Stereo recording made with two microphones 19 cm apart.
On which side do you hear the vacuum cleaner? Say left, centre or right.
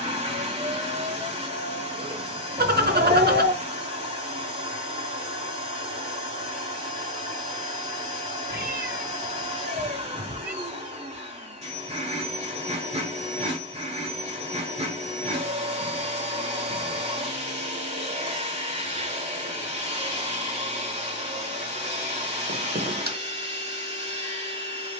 right.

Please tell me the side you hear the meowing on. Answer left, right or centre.
right.